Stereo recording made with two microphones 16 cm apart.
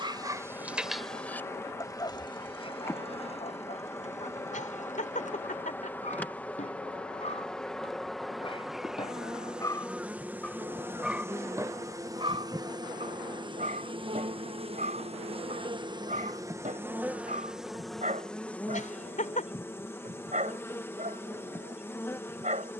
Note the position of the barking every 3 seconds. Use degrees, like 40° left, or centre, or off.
10° left, 50° left, 40° left, 10° left, 50° right, 50° right, 50° right, 50° right.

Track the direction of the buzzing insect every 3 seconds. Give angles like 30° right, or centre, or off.
20° left, 20° left, centre, 10° right, 30° right, 20° right, 10° left, 10° left.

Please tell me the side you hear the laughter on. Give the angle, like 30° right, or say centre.
50° left.